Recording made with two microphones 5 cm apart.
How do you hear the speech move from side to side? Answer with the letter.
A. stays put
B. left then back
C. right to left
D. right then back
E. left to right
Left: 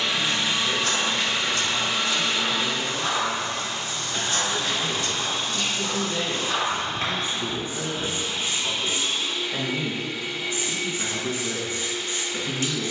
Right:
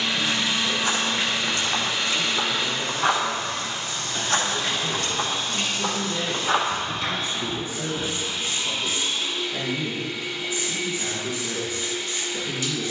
C.